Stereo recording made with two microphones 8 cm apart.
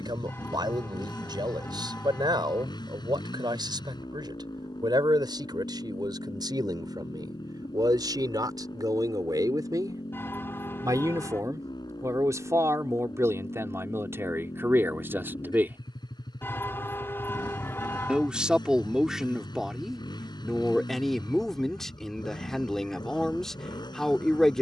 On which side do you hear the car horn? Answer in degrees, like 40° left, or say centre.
30° left.